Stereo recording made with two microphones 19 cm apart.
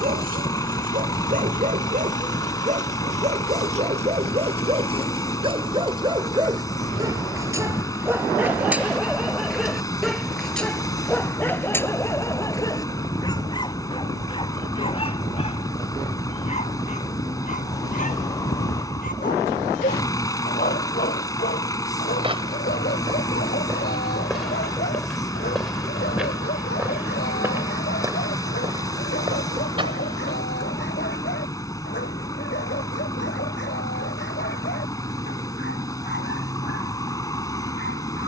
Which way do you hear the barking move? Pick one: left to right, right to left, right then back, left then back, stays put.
right to left.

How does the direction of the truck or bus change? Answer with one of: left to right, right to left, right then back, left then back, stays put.
stays put.